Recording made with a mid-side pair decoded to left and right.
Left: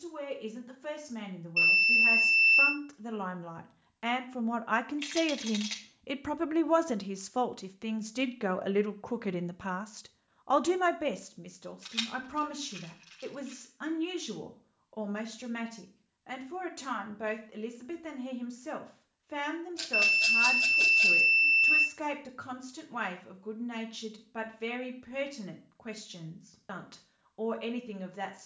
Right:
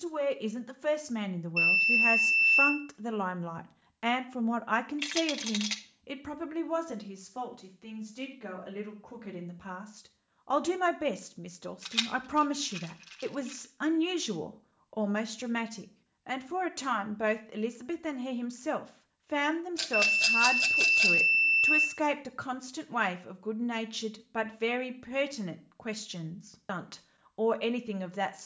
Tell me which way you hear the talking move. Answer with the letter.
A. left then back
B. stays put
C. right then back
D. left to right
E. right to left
A.